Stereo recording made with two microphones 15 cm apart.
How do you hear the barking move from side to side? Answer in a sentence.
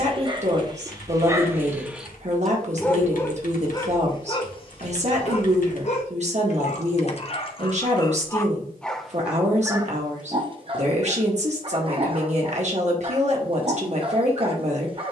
You can hear the barking move from right to left and back again.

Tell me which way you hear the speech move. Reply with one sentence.
In this clip you hear the speech stay in one place.